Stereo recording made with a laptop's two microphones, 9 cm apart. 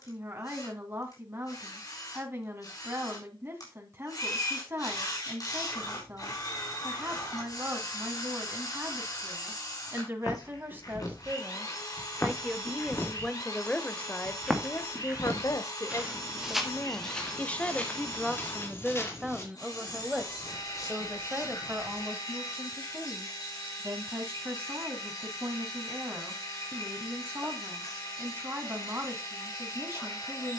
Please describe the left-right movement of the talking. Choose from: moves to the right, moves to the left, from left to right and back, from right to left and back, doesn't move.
from right to left and back.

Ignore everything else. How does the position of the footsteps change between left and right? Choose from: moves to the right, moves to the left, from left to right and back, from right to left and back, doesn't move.
from left to right and back.